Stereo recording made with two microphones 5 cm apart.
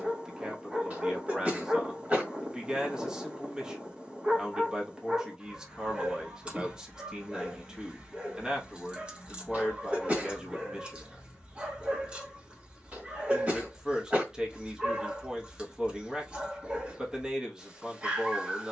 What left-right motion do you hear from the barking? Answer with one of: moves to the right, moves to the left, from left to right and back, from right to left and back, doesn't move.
doesn't move.